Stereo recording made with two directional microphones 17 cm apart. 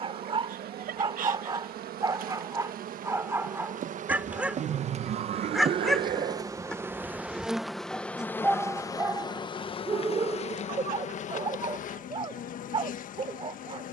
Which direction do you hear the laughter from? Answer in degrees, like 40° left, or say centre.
50° right.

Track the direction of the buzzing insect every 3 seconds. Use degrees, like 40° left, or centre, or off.
60° right, 40° right, centre, 40° left, 50° left.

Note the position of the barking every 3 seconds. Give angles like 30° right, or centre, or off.
30° right, 10° right, centre, 30° right, 30° right.